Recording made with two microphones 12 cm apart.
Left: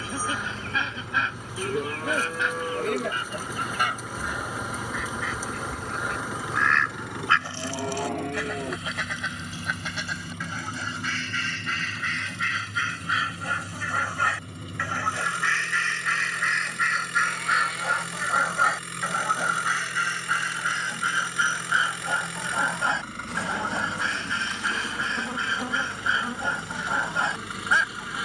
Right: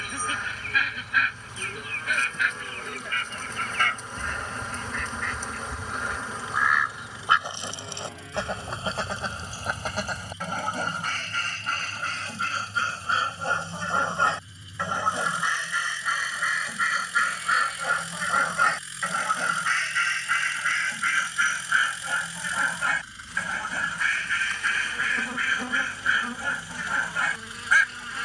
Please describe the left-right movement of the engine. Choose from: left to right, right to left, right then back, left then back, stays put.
stays put.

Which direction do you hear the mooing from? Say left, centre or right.
left.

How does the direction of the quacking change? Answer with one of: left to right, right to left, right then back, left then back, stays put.
right then back.